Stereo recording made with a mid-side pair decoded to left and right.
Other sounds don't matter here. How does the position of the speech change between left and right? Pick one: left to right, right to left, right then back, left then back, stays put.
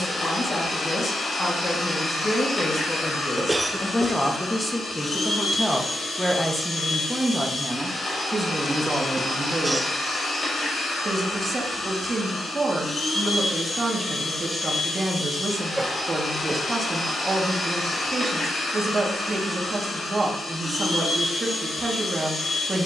left to right.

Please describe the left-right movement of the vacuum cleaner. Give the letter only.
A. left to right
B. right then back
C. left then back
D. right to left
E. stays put
E.